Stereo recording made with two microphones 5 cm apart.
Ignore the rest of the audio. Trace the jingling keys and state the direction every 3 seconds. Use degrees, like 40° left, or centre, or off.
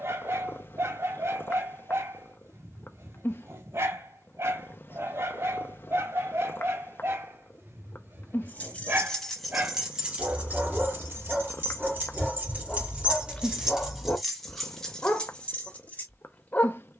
off, off, 20° left, 30° right, 20° right, 20° left.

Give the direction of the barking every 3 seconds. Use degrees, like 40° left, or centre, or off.
60° right, 60° right, 50° right, 20° right, 20° left, 30° left.